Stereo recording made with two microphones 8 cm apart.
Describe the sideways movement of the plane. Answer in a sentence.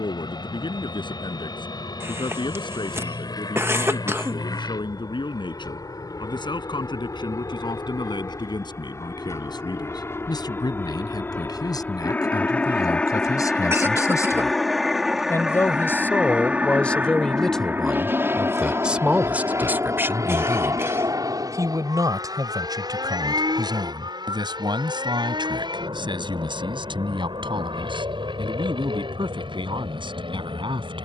In this clip you hear the plane travel towards the right.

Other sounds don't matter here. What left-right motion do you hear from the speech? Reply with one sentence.
In this clip you hear the speech move to the right.